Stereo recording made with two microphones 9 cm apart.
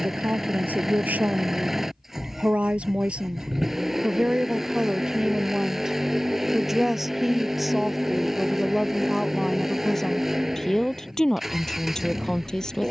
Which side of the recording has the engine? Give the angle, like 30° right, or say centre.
centre.